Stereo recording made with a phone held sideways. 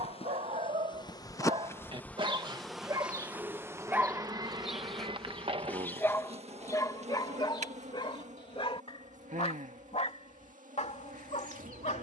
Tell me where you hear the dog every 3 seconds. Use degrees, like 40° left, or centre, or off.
40° right, 10° right, 30° left, 50° left.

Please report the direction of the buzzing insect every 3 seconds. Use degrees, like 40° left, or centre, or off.
20° left, 30° right, 50° right, 60° right.